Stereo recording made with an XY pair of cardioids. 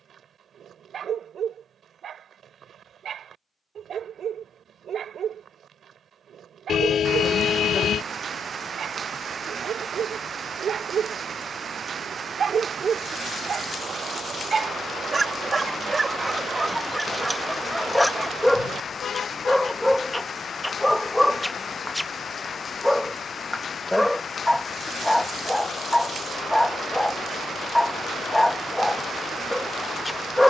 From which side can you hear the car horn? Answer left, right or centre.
left.